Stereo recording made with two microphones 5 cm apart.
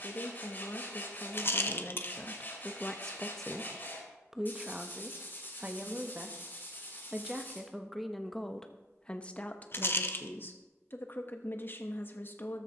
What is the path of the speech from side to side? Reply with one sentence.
You can hear the speech go right and come back.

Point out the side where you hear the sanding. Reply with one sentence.
You can hear the sanding on the left.